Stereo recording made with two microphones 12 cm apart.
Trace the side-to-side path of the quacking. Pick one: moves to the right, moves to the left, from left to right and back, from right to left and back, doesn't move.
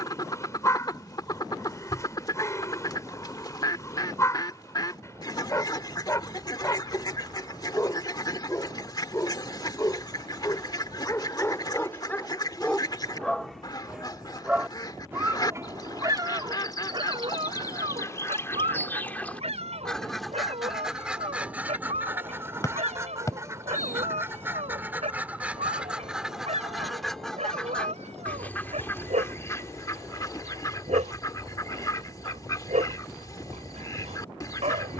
from left to right and back.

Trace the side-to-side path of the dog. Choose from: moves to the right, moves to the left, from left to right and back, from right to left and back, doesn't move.
moves to the right.